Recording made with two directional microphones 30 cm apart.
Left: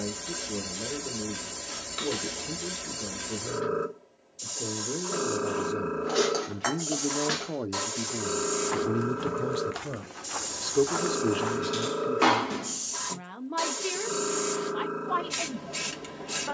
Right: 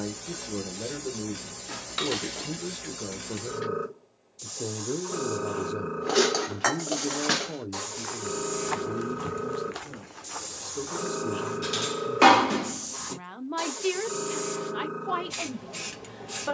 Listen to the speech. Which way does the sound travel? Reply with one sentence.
You can hear the speech move from right to left and back again.